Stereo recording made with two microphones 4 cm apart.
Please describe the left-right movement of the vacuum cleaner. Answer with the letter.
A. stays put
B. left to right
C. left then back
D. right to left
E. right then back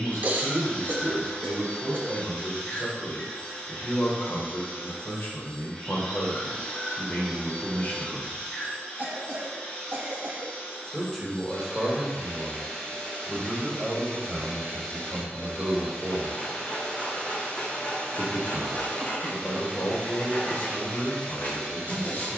A.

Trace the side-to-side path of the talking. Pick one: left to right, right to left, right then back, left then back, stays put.
right then back.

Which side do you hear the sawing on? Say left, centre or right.
left.